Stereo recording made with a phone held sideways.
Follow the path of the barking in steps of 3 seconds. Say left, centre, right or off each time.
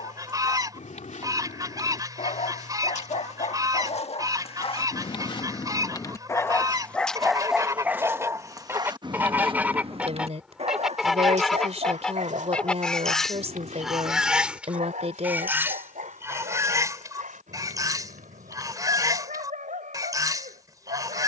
left, left, centre, right, right, right, right.